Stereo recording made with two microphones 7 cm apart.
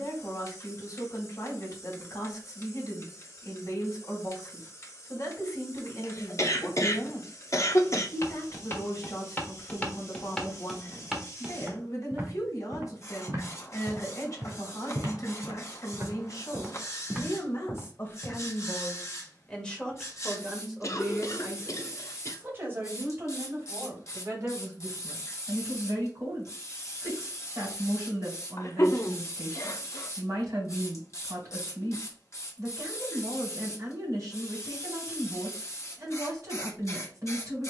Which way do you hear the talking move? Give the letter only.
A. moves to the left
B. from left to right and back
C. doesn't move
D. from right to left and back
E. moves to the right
E.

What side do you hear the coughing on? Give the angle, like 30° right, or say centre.
40° left.